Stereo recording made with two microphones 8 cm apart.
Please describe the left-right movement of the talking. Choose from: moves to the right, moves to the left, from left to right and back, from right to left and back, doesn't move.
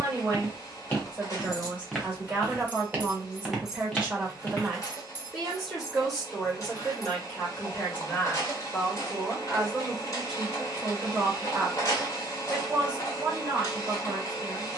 from right to left and back.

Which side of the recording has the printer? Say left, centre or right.
left.